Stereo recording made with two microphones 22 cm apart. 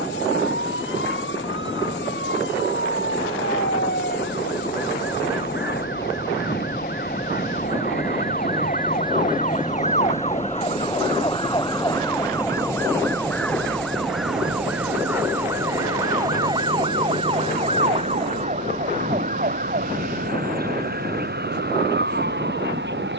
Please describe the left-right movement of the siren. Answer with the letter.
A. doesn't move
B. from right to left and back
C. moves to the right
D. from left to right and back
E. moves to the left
C.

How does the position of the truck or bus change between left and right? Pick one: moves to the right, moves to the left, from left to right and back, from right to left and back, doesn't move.
moves to the right.